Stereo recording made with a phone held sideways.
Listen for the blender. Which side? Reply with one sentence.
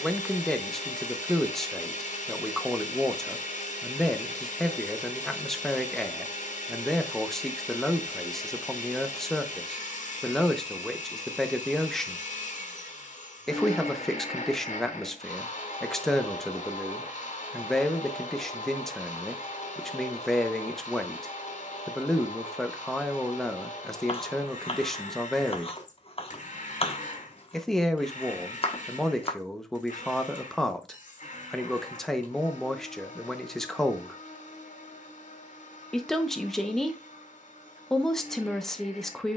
You can hear the blender on the left.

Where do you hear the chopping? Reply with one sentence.
In this clip you hear the chopping on the left.